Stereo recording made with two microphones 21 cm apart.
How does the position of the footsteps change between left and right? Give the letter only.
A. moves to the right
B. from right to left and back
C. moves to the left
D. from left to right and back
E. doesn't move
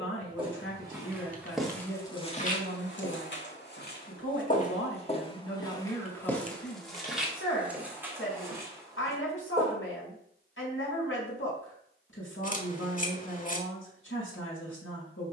B.